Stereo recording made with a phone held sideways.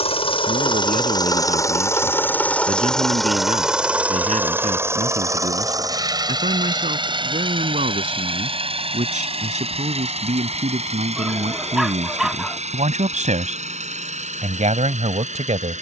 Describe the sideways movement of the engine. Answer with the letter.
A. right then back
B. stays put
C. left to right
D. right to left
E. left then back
C.